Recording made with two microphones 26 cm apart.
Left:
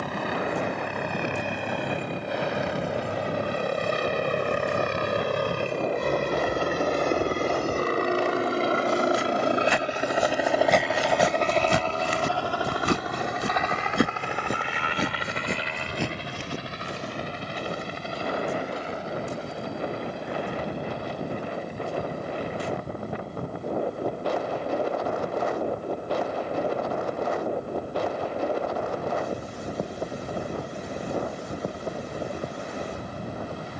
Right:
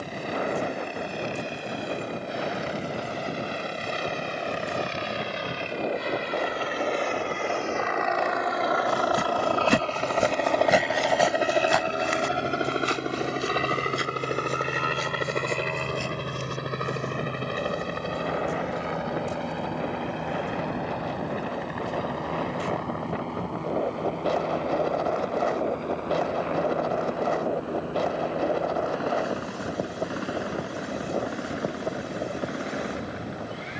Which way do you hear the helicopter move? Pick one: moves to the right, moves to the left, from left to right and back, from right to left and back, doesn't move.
moves to the right.